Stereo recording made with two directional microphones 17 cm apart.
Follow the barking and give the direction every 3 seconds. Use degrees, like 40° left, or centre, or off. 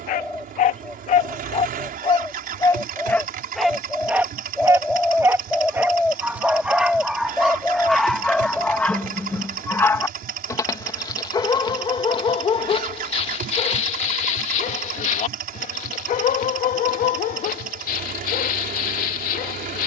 40° left, 10° right, centre, 20° left, 40° left, 50° left, 60° left.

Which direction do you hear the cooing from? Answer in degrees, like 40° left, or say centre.
centre.